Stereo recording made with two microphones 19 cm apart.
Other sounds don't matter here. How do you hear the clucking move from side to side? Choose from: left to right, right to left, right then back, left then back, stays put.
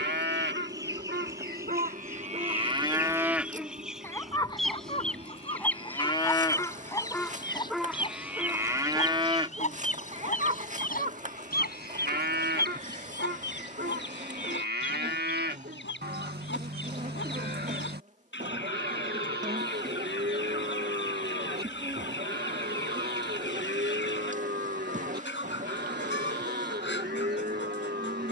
right to left.